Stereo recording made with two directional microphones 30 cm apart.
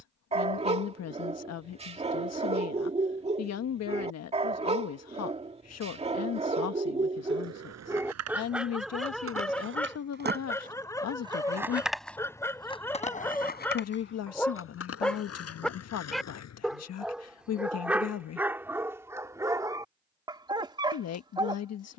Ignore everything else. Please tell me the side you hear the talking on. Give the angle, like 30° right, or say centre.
60° left.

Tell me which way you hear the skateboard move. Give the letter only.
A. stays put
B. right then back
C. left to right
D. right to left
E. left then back
D.